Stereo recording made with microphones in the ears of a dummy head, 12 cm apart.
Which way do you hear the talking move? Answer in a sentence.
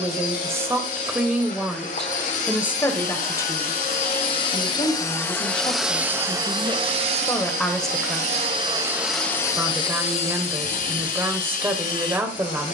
You can hear the talking move from right to left and back again.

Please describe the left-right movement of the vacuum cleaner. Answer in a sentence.
You can hear the vacuum cleaner move from left to right and back again.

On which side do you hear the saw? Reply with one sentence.
You can hear the saw on the left.